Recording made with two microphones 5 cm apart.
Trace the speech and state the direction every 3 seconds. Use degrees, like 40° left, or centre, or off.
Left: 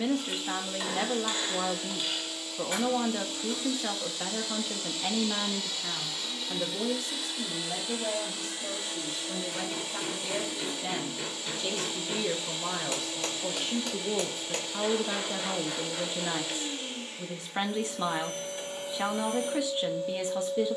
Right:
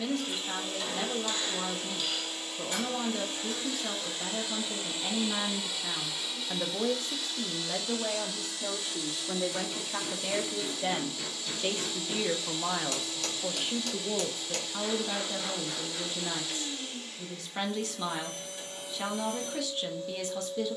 30° left, 20° left, 40° right, 50° right, 10° right, 20° left, 20° left.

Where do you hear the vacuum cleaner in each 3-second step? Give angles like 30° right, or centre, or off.
50° right, 30° right, 10° left, 30° left, 30° left, 30° left, 30° left.